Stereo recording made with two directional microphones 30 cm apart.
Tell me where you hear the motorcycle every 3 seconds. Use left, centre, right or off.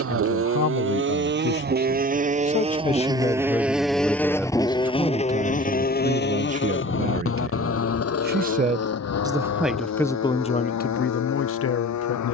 right, centre, left, left.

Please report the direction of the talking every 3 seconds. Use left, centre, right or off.
left, centre, right, left.